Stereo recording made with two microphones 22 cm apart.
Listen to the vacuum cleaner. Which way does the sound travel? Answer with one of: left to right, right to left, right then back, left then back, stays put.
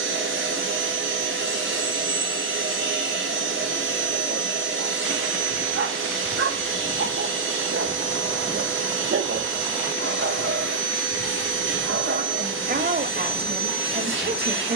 stays put.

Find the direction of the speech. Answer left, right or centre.
right.